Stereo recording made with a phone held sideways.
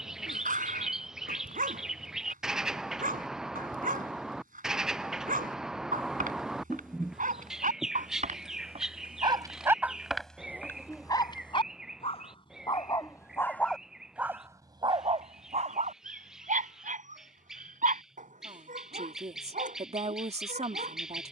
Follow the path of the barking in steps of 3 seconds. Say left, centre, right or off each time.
right, right, right, centre, centre, right, right.